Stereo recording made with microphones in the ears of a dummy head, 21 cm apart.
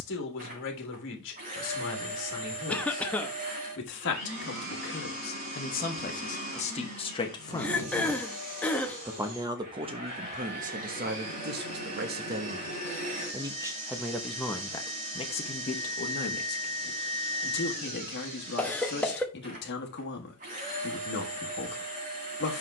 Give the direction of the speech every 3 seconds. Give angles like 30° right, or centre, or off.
60° left, 50° left, 20° left, 30° right, 10° right, 40° left, 50° left, 50° left.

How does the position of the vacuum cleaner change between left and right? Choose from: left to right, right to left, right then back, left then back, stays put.
stays put.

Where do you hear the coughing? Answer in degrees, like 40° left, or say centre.
10° left.